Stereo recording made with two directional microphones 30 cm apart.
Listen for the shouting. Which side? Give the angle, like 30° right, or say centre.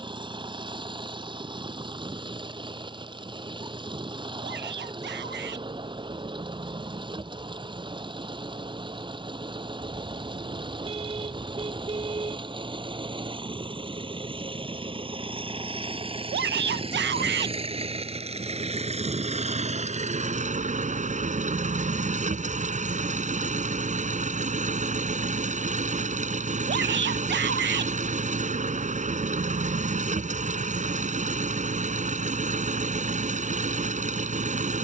40° right.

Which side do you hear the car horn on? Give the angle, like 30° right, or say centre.
20° right.